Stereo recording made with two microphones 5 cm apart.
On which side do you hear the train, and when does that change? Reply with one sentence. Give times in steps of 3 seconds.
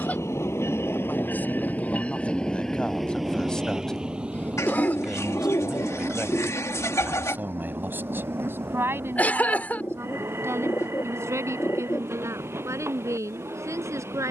You can hear the train on the left from 0 s and on the right from 3 s.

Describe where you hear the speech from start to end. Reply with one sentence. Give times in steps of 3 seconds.
You can hear the speech on the left from 0 s, in the centre from 3 s and on the right from 6 s.